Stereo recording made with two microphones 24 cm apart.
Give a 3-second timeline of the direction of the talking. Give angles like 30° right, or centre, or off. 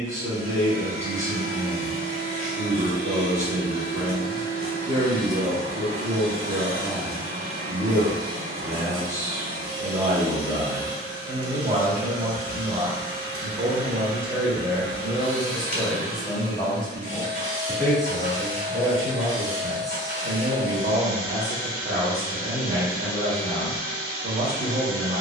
30° right, 30° right, 30° right, 30° right, 20° right, centre, 20° right, 30° right, 30° right.